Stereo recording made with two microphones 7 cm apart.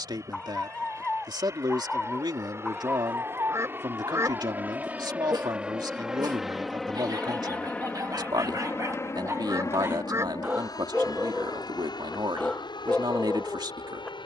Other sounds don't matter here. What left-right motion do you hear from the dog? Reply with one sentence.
In this clip you hear the dog move from left to right and back again.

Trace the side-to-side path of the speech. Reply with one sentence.
You can hear the speech stay in one place.